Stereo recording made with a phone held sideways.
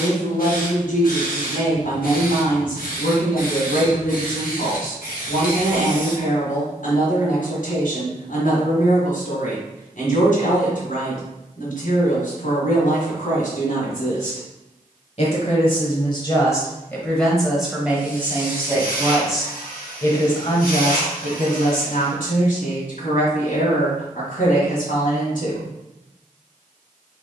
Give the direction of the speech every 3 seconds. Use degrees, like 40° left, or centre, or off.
70° left, 70° left, 70° left, 70° left, 70° left, 20° left, 10° left, 60° left, 70° left.